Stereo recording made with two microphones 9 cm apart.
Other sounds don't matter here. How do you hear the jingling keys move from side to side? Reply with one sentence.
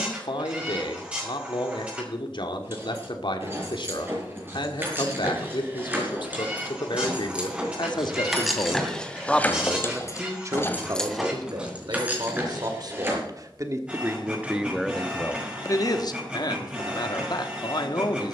You can hear the jingling keys move from right to left and back again.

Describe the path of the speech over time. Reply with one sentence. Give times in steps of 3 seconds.
You can hear the speech on the left from 0 s, on the right from 9 s and on the left from 15 s.